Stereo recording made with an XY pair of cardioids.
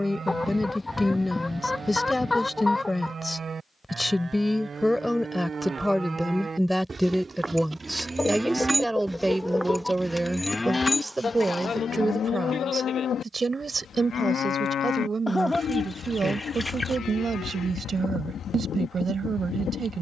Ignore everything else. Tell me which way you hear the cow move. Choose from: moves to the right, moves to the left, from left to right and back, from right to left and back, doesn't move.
moves to the left.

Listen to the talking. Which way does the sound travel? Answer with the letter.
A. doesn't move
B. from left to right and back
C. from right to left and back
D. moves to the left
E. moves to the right
E.